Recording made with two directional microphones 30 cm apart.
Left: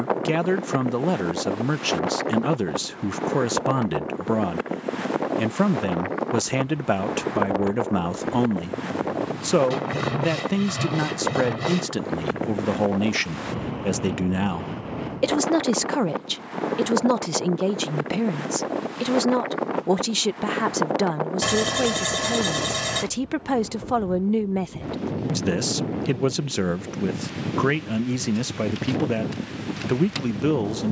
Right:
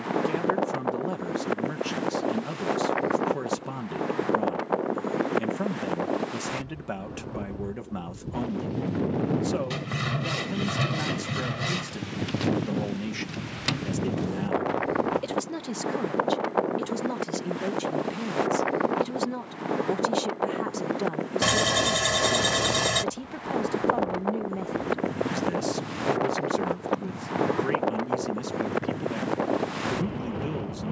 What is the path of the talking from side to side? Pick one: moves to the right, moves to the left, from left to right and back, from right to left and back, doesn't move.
doesn't move.